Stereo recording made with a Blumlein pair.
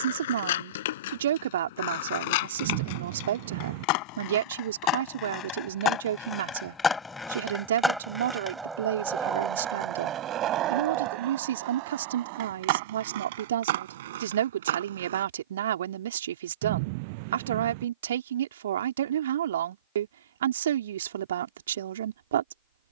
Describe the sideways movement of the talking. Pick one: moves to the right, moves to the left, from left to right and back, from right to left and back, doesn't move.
doesn't move.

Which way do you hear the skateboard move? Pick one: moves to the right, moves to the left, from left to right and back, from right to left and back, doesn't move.
moves to the right.